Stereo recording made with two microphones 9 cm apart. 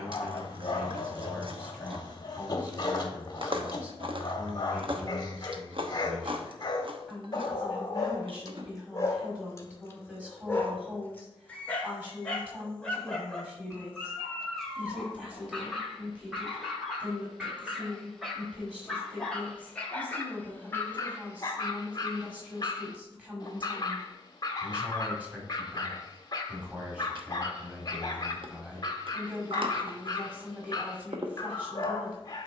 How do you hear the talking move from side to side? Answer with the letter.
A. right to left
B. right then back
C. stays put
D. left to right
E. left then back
C.